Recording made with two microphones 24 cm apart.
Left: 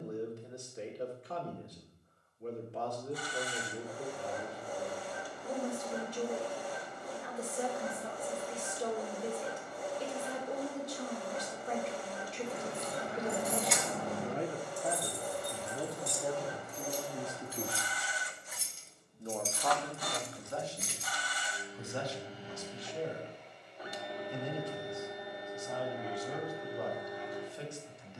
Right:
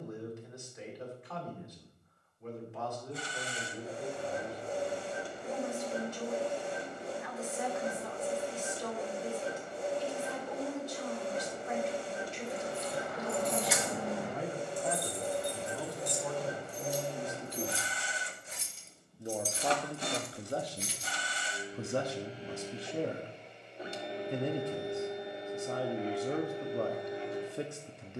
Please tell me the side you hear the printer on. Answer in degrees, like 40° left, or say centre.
30° right.